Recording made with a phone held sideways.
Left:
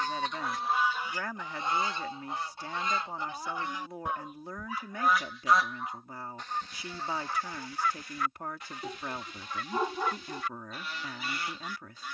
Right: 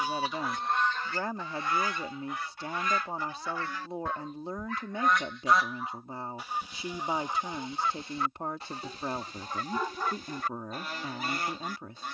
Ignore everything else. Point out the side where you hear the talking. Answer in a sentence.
In this clip you hear the talking on the right.